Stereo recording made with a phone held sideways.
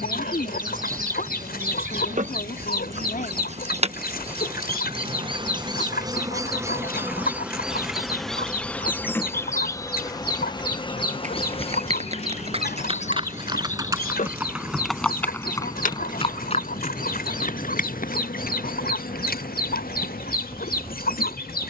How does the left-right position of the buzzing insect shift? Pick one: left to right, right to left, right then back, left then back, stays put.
right to left.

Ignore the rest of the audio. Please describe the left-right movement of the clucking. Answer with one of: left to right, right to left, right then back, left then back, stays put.
stays put.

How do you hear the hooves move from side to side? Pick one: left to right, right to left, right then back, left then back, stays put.
right to left.